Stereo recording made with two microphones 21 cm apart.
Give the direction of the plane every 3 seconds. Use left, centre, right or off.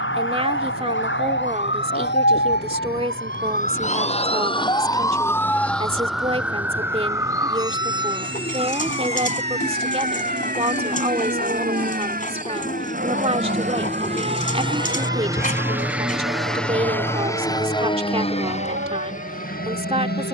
right, right, right, right, right, centre, left.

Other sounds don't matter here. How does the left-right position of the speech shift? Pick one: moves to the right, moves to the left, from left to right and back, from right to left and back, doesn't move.
doesn't move.